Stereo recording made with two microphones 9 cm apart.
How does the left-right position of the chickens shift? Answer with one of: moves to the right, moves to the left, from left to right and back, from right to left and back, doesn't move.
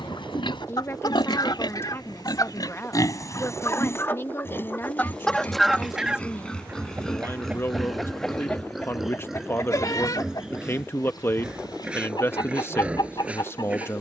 from left to right and back.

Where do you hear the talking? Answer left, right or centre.
left.